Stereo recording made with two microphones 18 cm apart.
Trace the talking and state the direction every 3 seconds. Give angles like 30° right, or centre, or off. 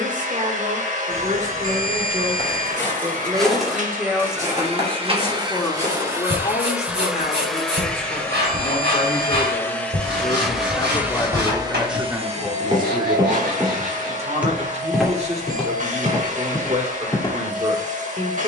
40° right, centre, 40° left, 30° left, 30° right, 40° right.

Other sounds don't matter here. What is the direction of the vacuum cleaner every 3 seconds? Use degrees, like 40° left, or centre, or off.
40° right, 40° right, centre, centre, 40° right, 40° right.